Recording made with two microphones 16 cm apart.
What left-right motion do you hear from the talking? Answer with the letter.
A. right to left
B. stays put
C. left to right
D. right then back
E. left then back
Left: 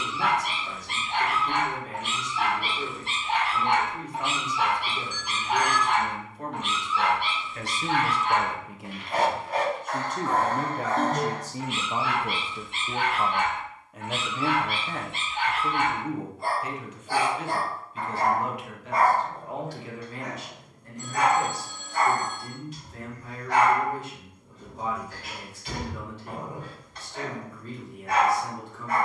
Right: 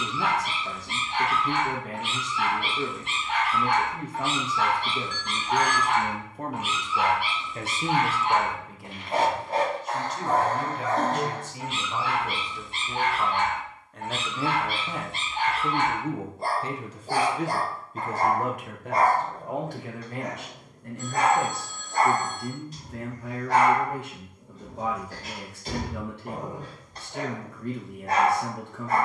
E.